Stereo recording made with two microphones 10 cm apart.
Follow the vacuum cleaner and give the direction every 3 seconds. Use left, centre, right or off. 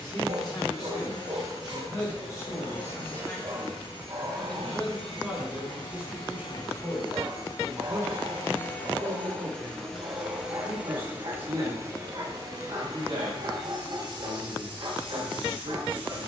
left, left, left, centre, right, right.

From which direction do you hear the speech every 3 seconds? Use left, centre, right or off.
left, centre, right, right, right, right.